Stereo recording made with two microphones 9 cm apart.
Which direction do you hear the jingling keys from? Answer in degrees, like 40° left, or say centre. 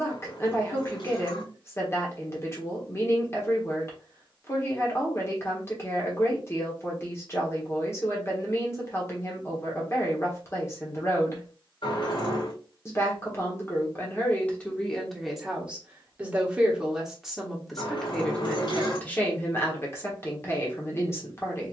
60° left.